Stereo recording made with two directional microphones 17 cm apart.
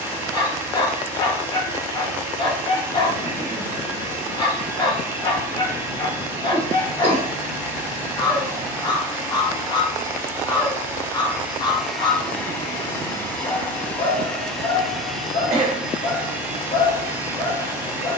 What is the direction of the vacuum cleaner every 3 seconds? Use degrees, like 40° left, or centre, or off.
20° right, 20° right, 20° right, 10° right, 10° left, 10° right.